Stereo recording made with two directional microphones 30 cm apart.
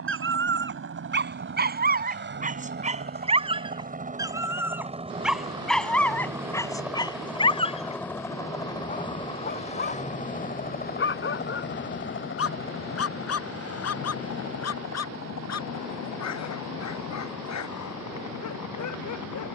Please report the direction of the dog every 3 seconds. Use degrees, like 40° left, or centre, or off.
30° right, 10° right, 10° left, 40° left, 50° left, 60° left, 60° left.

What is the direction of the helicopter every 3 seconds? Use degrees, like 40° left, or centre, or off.
40° right, 20° right, centre, 20° left, 40° left, 50° left, 60° left.